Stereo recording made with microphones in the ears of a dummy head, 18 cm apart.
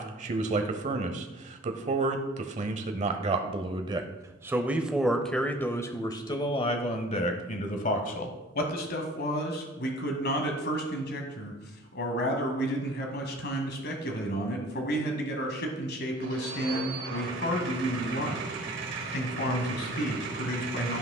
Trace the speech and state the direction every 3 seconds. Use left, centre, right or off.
right, centre, left, left, left, left, left.